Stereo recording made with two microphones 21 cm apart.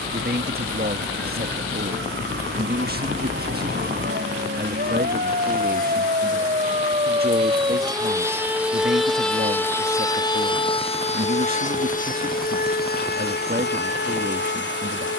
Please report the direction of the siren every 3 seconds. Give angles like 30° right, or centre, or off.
70° right, 50° right, 20° right, 20° left, 50° left.